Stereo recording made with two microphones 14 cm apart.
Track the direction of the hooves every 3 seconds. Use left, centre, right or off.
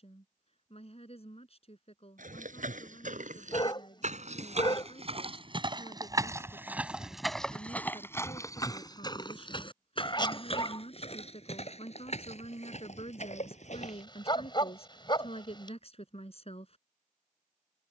right, right, centre, left, left, off.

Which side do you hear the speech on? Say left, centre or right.
left.